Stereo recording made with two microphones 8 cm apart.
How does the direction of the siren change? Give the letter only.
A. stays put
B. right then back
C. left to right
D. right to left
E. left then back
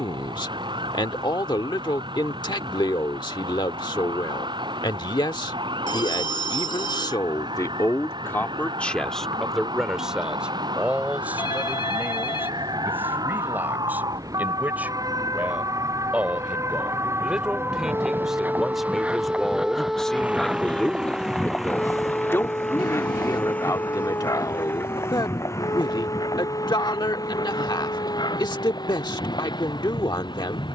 D.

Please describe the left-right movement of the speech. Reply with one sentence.
In this clip you hear the speech go right and come back.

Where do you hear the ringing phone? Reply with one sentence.
You can hear the ringing phone on the left.